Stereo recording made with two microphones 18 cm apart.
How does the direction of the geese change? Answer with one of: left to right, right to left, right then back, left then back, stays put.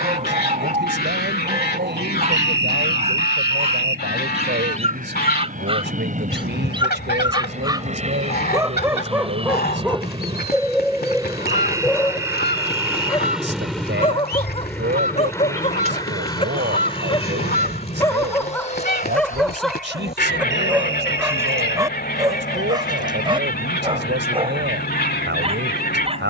stays put.